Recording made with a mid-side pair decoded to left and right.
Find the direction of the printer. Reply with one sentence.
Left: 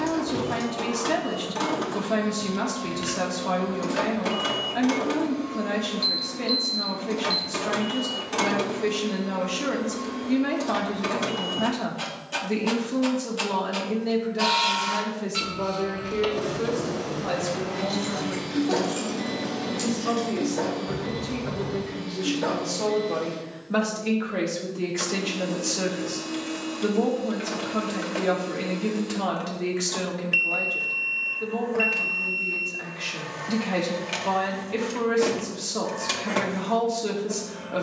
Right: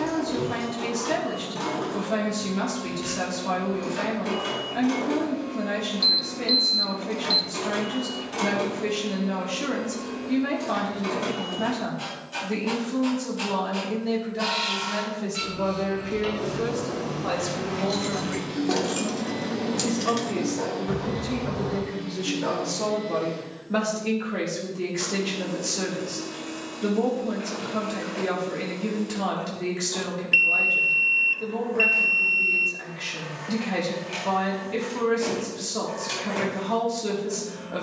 In this clip you hear the printer on the left.